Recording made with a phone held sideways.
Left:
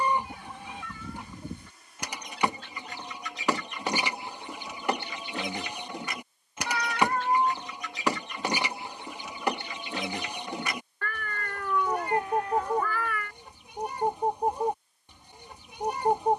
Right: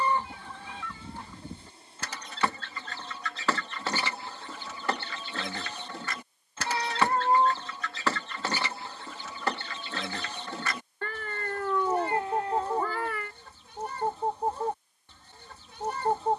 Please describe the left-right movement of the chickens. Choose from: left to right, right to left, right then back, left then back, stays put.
stays put.